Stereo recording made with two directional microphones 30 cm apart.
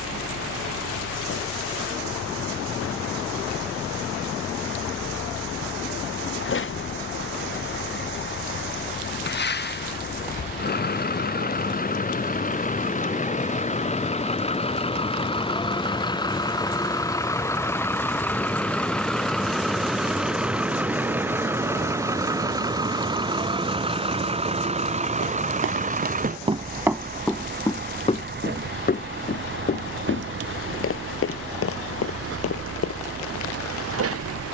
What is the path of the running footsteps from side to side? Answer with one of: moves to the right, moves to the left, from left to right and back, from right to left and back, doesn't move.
moves to the left.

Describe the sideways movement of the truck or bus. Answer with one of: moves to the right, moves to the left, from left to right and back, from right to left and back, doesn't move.
moves to the right.